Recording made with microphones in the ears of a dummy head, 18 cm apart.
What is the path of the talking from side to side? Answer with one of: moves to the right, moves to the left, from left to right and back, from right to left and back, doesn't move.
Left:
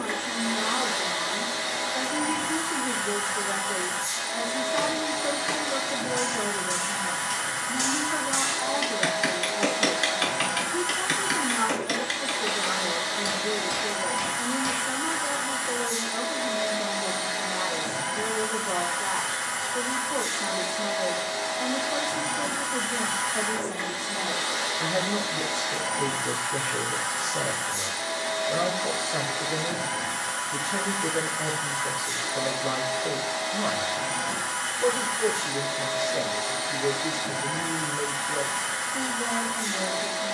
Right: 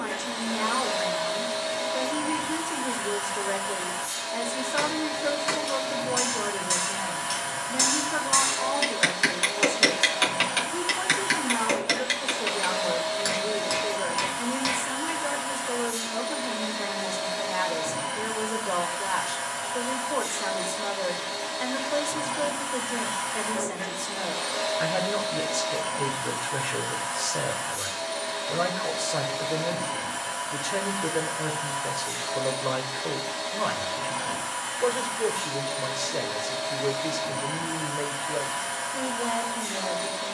doesn't move.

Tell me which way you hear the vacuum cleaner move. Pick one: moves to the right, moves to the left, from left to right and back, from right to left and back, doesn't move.
doesn't move.